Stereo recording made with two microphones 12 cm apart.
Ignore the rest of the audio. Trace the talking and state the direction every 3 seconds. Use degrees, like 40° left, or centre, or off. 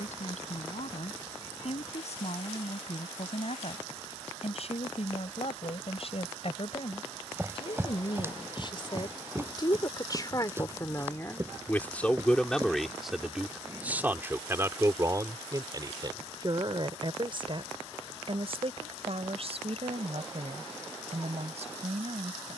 70° left, 60° left, 50° left, 30° left, 10° right, 40° right, 60° right, 70° right.